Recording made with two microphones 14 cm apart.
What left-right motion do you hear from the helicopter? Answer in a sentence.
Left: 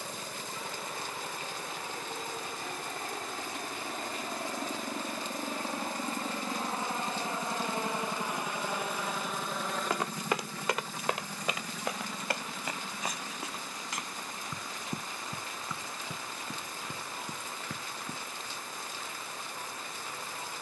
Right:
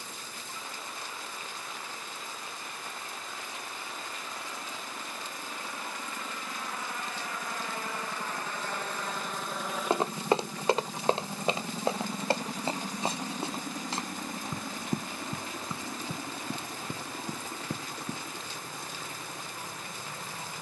In this clip you hear the helicopter move from left to right.